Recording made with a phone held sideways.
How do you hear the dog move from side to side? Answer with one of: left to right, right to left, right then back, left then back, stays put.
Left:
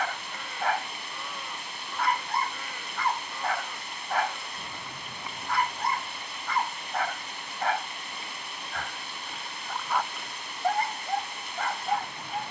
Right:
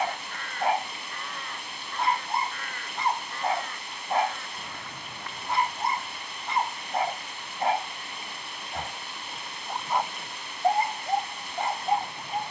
stays put.